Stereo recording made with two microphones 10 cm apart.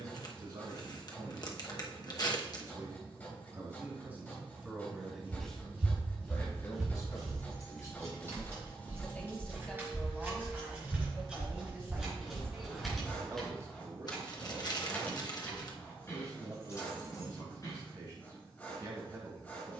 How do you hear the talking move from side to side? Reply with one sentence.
You can hear the talking go left and come back.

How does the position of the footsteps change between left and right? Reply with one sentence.
You can hear the footsteps move to the left.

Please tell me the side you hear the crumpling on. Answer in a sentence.
In this clip you hear the crumpling on the left.